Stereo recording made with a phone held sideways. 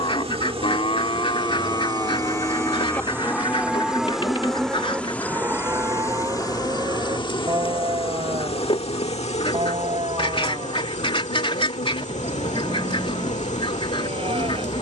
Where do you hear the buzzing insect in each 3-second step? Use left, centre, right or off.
right, centre, left, left, left.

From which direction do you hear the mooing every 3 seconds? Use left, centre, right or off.
left, centre, right, right, right.